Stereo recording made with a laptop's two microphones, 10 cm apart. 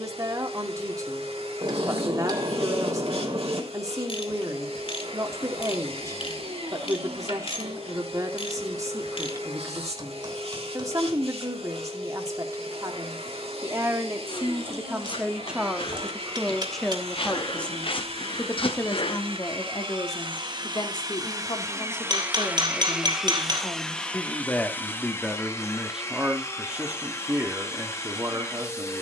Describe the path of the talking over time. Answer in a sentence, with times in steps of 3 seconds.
You can hear the talking on the right from 0 s, in the centre from 15 s, on the left from 18 s, in the centre from 24 s and on the right from 27 s.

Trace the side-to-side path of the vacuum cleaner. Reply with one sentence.
You can hear the vacuum cleaner travel towards the left.